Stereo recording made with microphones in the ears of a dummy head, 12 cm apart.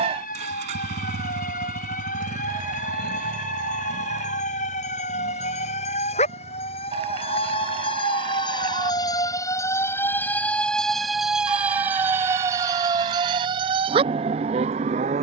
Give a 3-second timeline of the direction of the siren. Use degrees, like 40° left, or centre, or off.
70° left, 60° left, 40° left, 10° left, 30° right.